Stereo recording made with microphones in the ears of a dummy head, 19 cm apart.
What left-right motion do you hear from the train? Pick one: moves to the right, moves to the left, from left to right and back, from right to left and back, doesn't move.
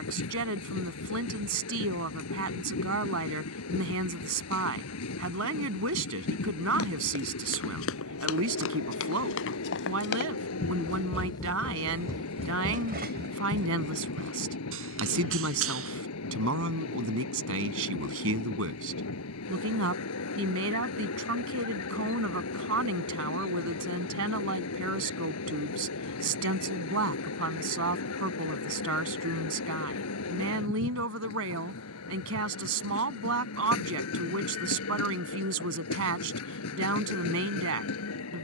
doesn't move.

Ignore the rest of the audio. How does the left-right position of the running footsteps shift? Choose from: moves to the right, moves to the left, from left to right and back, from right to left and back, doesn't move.
moves to the right.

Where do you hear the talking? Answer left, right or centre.
right.